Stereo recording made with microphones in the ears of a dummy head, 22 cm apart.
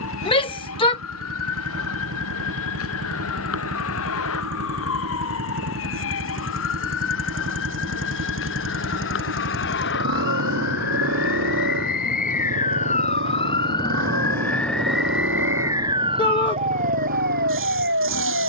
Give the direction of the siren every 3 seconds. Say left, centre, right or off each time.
left, left, left, left, left, right.